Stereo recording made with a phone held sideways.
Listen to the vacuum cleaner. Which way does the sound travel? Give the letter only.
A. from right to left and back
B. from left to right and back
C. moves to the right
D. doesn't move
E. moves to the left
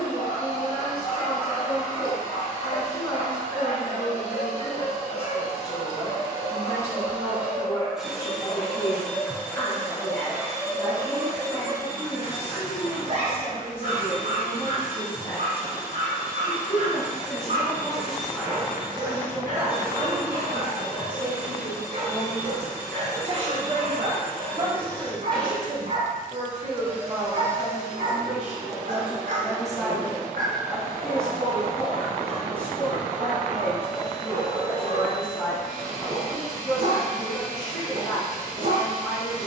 A.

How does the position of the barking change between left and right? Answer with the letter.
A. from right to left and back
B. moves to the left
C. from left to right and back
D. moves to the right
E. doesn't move
D.